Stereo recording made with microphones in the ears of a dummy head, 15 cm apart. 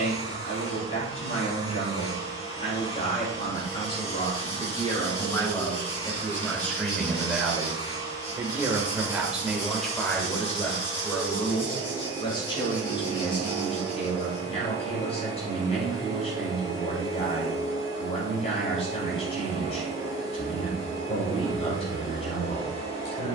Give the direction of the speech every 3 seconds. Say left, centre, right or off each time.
left, left, centre, centre, left, left, left, left.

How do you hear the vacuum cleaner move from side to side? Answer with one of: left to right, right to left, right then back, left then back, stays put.
stays put.